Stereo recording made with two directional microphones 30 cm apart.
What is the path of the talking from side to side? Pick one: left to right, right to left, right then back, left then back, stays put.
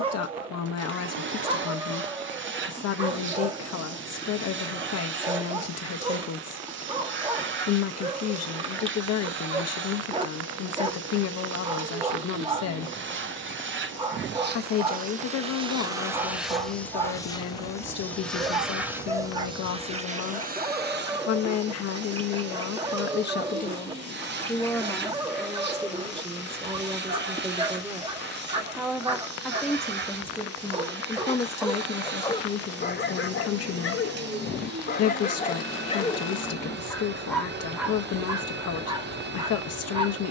right then back.